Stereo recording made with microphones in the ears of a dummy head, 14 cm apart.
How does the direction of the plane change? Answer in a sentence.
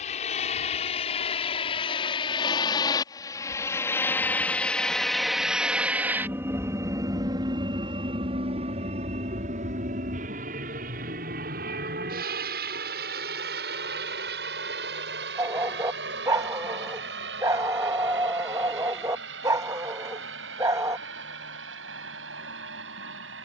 You can hear the plane move from left to right.